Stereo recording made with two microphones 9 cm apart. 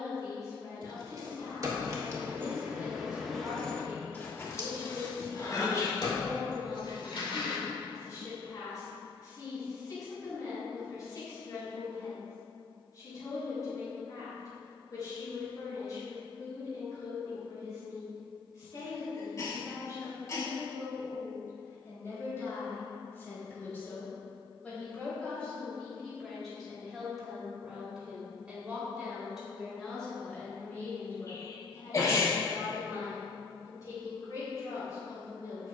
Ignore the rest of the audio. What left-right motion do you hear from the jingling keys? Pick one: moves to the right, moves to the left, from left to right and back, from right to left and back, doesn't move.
moves to the left.